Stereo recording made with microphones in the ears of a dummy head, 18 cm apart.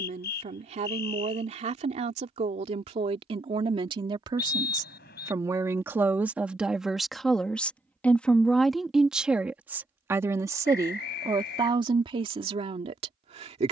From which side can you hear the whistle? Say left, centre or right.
left.